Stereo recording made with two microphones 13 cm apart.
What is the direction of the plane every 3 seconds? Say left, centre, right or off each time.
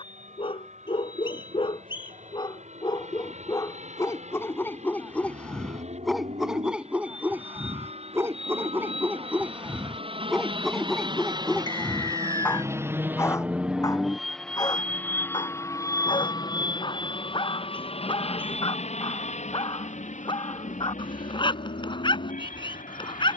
right, right, right, right, centre, left, left, left.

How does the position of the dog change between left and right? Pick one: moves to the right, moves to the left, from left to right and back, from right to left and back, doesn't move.
from left to right and back.